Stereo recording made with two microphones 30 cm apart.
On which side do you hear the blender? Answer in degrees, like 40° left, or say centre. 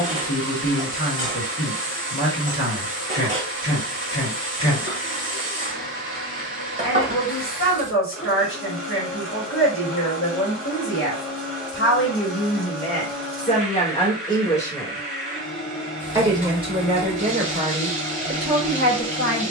40° left.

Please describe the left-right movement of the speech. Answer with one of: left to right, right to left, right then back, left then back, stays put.
left to right.